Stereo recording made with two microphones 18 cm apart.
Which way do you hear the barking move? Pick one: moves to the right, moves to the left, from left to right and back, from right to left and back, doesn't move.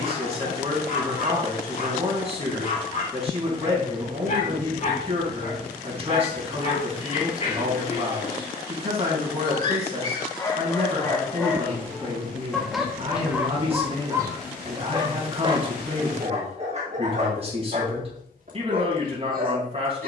moves to the right.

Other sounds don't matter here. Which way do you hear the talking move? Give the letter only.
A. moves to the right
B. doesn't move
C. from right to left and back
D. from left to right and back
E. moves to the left
B.